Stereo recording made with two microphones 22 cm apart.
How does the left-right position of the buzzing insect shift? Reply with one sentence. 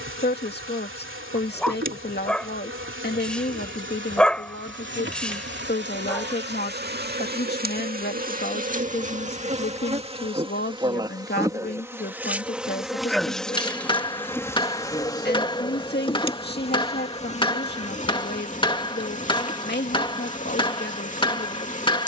In this clip you hear the buzzing insect move to the left.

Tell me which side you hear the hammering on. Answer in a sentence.
You can hear the hammering on the left.